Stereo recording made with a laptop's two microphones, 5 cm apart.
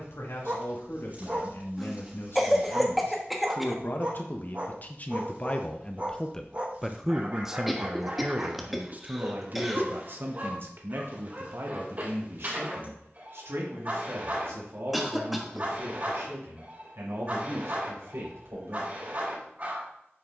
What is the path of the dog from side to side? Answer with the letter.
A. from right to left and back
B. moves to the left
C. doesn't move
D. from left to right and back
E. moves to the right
C.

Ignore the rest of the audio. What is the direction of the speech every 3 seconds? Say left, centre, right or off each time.
left, left, centre, right, right, right, right.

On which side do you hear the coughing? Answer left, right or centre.
centre.